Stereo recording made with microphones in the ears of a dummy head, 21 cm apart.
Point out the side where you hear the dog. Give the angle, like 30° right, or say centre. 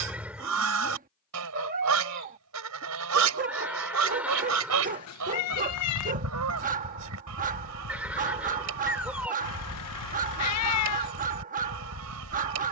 40° right.